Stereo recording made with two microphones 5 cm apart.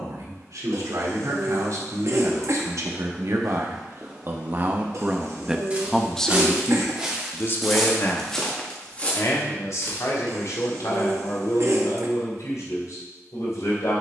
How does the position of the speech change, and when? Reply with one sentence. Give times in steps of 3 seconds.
You can hear the speech on the right from 0 s and on the left from 6 s.